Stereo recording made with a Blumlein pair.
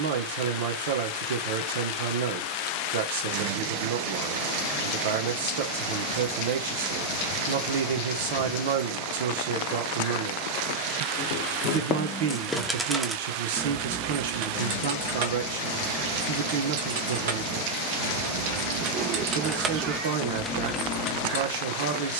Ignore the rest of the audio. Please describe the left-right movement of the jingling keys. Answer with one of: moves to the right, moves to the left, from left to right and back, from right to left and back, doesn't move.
from left to right and back.